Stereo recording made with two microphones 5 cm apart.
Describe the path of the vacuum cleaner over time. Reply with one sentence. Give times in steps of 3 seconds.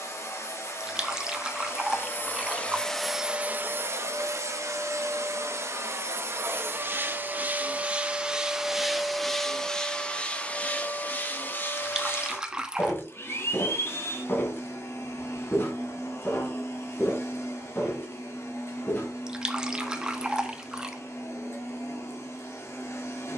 You can hear the vacuum cleaner on the left from 0 s, on the right from 3 s and on the left from 9 s.